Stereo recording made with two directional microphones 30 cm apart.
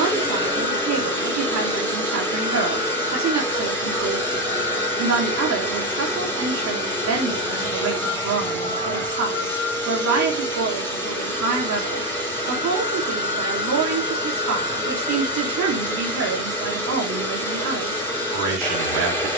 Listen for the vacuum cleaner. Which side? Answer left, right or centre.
centre.